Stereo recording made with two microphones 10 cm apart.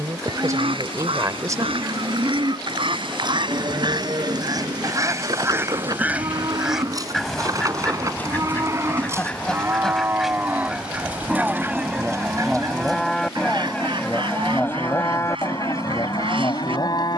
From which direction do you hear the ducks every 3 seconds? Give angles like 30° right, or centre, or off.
70° right, 40° right, centre, 10° right, 50° right, 70° right.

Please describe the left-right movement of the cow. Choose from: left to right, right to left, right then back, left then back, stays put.
right to left.